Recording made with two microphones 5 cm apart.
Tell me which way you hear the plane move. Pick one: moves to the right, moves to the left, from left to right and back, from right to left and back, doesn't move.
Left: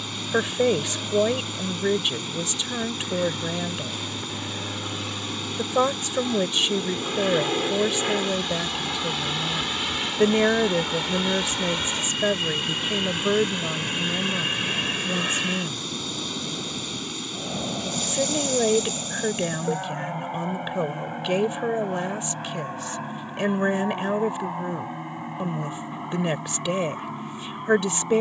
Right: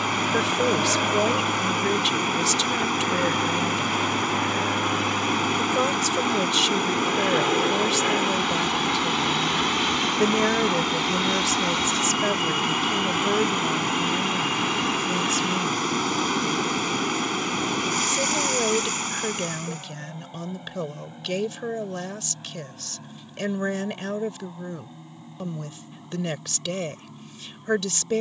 moves to the left.